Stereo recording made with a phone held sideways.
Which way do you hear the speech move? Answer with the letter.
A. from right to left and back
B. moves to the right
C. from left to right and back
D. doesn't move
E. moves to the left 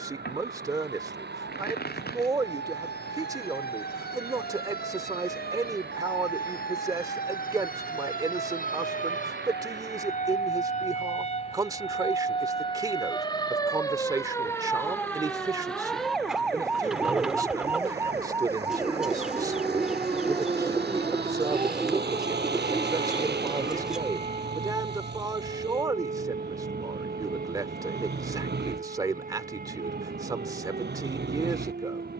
D.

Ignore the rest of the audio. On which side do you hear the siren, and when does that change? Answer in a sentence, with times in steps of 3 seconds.
You can hear the siren on the left from 0 s, in the centre from 15 s and on the right from 18 s.